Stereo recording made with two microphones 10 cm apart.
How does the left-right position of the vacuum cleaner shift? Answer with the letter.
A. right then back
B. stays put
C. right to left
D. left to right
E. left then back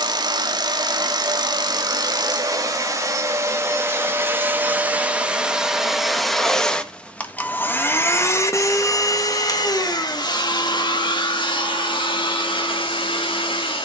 C.